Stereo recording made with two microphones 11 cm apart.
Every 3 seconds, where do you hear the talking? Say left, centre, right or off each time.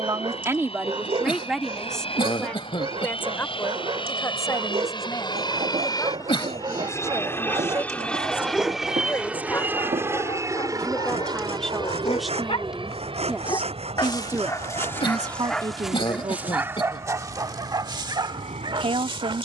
centre, left, left, centre, centre, right, right.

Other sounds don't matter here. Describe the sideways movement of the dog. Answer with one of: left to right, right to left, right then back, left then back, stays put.
left then back.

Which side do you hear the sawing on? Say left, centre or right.
right.